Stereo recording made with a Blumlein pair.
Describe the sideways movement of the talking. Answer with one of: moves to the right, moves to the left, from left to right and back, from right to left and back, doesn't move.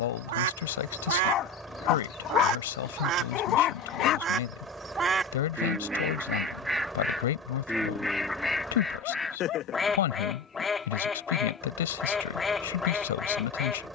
doesn't move.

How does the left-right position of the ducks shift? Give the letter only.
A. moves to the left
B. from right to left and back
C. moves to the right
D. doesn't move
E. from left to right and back
A.